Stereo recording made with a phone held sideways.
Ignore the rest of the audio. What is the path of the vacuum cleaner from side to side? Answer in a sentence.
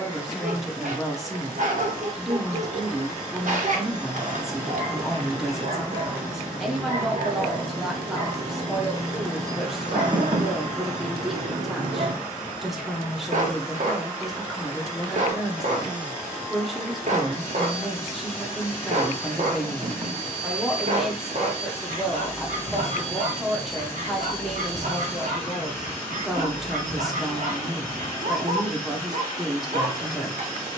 You can hear the vacuum cleaner stay put.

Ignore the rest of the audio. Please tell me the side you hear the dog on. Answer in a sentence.
You can hear the dog on the right.